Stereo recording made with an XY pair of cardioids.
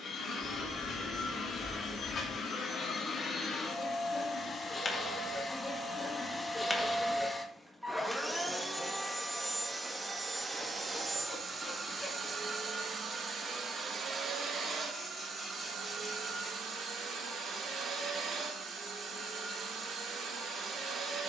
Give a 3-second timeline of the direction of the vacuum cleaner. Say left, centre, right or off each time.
left, left, centre, right, right, right, right.